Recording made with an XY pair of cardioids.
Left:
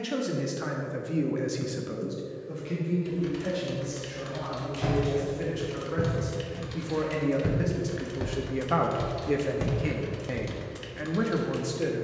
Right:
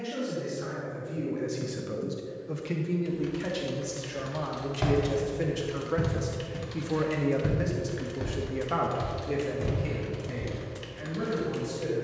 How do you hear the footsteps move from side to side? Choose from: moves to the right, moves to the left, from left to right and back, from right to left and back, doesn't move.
moves to the left.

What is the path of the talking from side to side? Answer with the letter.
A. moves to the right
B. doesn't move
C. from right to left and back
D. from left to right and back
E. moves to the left
D.